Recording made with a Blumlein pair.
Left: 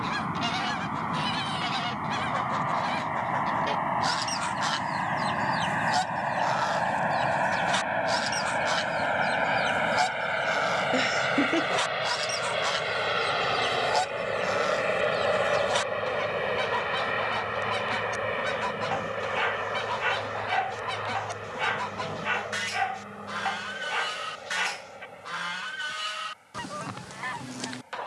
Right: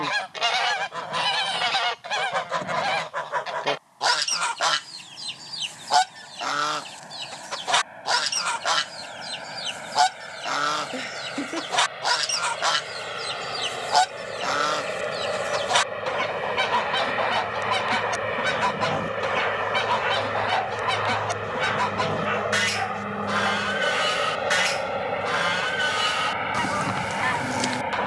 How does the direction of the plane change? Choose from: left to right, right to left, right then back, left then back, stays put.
left to right.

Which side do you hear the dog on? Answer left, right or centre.
centre.